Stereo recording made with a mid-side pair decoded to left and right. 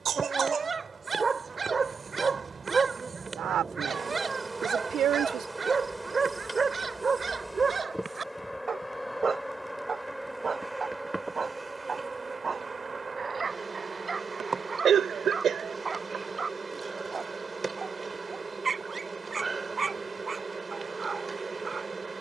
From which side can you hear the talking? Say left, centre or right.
right.